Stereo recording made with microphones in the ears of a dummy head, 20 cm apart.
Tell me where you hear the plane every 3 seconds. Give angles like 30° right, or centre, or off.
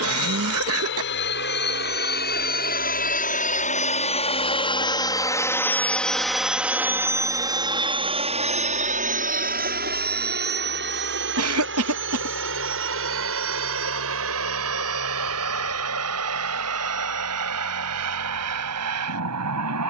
50° left, 20° left, 20° right, 40° right, 60° right, 70° right, 70° right.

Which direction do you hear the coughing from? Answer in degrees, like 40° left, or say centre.
70° right.